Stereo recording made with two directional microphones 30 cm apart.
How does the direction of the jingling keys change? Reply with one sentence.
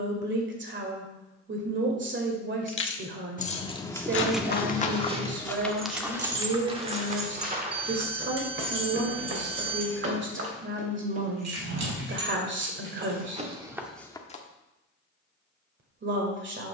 You can hear the jingling keys move from left to right.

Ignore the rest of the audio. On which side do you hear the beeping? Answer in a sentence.
In this clip you hear the beeping on the right.